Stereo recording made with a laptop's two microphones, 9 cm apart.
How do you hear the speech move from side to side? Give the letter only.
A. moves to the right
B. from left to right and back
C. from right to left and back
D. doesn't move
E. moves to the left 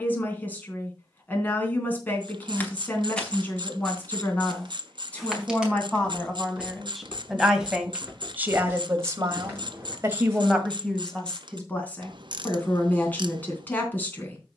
B.